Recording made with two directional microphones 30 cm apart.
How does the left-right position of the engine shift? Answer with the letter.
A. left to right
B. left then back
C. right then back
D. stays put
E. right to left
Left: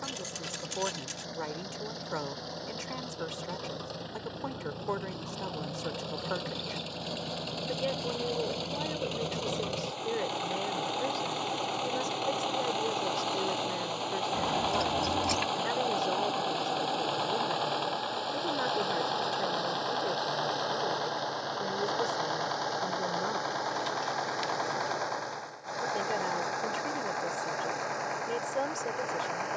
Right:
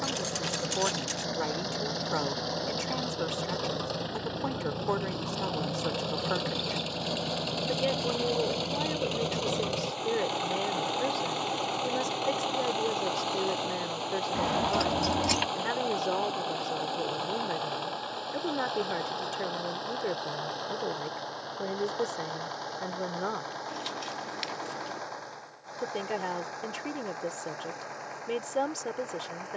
E.